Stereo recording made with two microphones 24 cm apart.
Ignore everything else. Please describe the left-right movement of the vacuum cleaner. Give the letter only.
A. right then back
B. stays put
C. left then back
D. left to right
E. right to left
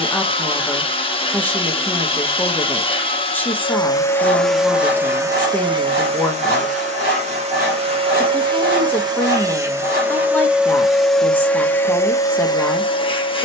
A.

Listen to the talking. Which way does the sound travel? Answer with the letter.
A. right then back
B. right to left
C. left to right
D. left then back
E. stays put
E.